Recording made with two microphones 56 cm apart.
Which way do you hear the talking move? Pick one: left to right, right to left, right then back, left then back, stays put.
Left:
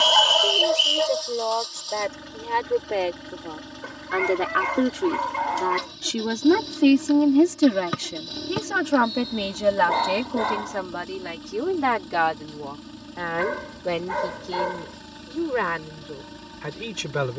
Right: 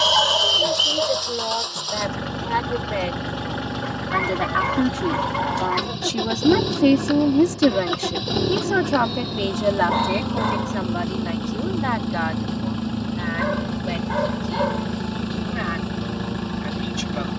right to left.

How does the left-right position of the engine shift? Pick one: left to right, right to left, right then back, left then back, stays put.
stays put.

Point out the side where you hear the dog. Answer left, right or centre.
centre.